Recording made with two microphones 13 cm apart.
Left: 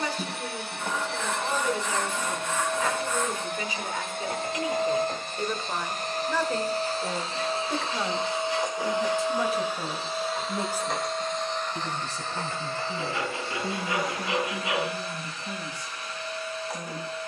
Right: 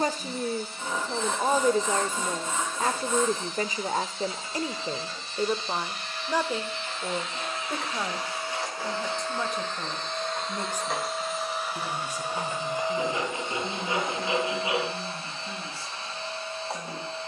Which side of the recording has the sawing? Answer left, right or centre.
right.